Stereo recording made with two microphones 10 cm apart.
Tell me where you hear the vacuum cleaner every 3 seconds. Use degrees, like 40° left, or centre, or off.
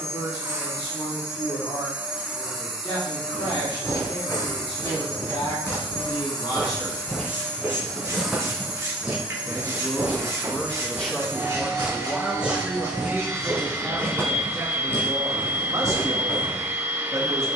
20° right, 40° left, 20° left, 20° right, 20° right, 20° right.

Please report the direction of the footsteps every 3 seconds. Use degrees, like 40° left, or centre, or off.
off, 40° left, 10° left, 20° right, 10° left, 30° left.